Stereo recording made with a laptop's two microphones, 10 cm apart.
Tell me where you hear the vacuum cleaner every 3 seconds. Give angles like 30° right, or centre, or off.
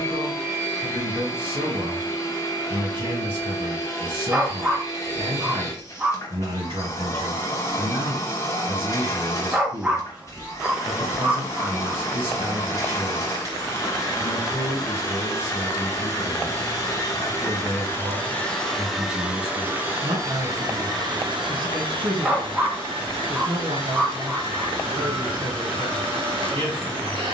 30° left, 30° left, 30° left, 30° left, 30° left, 30° left, 10° right, 50° right, 60° right.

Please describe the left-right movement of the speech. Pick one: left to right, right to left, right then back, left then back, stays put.
stays put.